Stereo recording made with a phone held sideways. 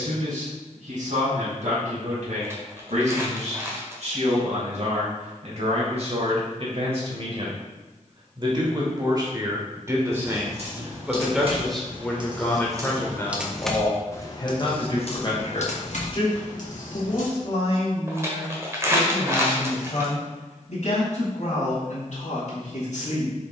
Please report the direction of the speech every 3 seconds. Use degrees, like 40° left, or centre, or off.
70° right, 60° right, 40° right, 20° right, 20° left, 50° left, 60° left, 60° left.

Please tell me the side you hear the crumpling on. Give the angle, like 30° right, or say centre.
20° right.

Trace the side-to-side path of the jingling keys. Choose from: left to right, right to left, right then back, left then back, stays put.
right to left.